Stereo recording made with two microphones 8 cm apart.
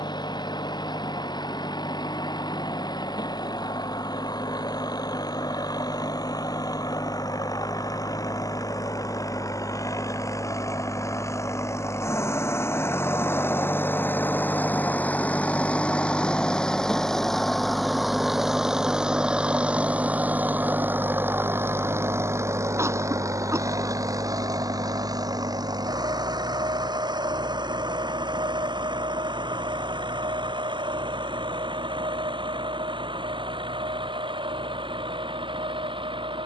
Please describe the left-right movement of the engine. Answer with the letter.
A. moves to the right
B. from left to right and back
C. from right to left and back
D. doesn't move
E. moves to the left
A.